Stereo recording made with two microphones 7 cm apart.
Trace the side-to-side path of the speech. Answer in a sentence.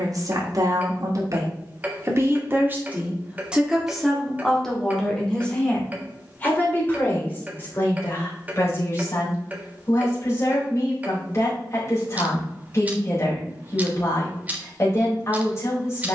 In this clip you hear the speech move to the left.